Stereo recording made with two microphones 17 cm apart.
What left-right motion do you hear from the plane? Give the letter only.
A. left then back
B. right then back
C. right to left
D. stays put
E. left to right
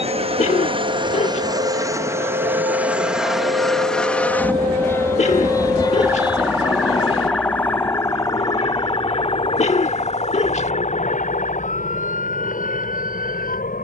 C.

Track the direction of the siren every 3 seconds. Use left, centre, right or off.
right, right, centre, left, left.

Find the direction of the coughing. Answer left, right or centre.
left.